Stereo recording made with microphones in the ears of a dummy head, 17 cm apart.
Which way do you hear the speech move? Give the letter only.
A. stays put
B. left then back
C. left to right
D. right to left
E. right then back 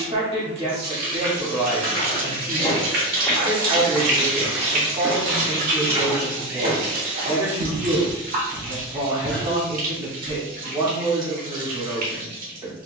A.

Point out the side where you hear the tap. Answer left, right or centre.
right.